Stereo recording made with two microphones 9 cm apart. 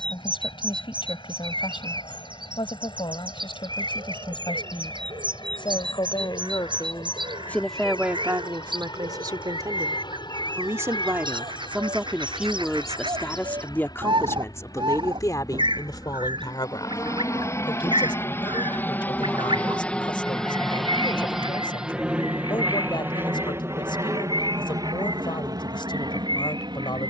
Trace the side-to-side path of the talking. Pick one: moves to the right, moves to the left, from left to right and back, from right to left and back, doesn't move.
from left to right and back.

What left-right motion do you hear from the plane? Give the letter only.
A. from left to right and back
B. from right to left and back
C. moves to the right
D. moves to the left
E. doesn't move
C.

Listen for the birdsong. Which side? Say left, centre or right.
right.